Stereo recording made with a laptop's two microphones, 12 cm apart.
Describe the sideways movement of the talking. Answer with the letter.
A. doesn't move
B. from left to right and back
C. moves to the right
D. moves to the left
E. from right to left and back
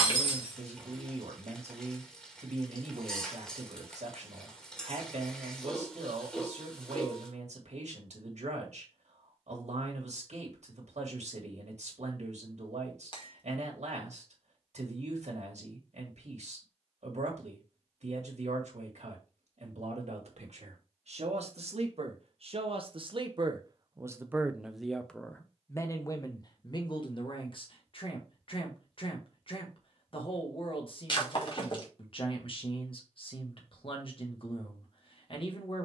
D.